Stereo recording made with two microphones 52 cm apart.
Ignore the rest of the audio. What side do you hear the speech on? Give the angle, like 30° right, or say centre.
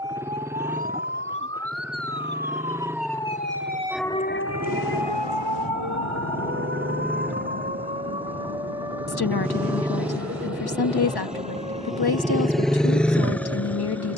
40° left.